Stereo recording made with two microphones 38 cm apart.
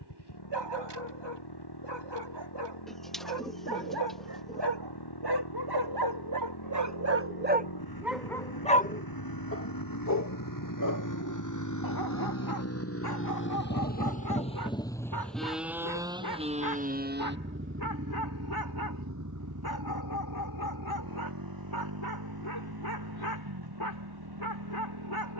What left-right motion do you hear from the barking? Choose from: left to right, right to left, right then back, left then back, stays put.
right to left.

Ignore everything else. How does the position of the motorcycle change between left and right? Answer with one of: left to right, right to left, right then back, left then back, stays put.
left to right.